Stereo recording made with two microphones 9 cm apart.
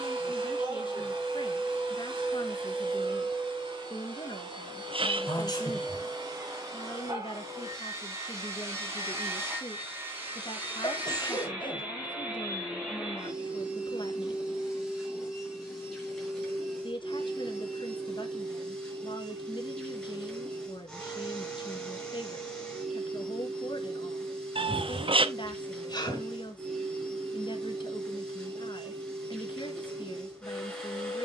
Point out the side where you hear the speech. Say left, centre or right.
left.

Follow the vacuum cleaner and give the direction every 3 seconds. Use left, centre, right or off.
right, right, right, right, centre, centre, centre, centre, centre, centre, centre.